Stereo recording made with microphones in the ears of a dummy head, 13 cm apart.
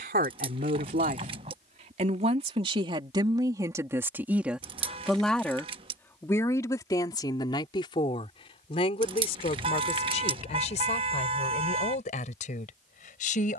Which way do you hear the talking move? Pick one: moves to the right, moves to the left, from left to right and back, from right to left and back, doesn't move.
moves to the left.